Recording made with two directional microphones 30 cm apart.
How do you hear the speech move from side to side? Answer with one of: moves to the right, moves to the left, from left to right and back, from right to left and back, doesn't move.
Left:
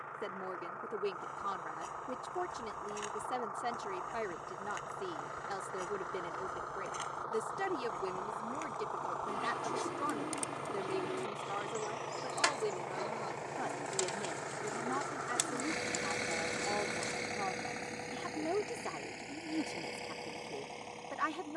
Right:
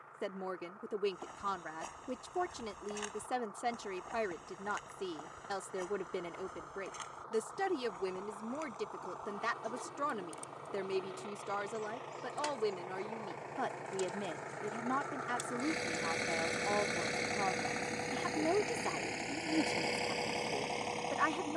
doesn't move.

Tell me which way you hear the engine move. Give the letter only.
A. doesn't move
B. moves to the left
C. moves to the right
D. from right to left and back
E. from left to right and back
C.